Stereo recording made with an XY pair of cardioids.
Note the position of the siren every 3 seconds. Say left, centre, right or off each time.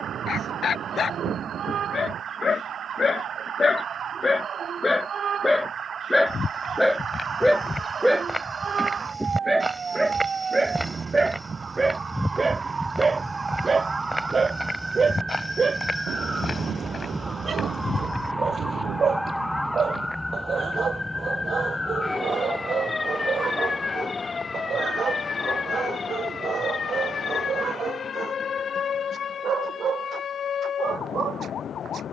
right, right, right, right, right, centre, centre, left, left, left, left.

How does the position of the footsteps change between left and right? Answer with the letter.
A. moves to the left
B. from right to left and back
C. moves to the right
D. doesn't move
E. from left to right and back
E.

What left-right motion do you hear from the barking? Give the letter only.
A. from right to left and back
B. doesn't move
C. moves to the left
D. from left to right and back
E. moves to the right
E.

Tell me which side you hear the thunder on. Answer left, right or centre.
right.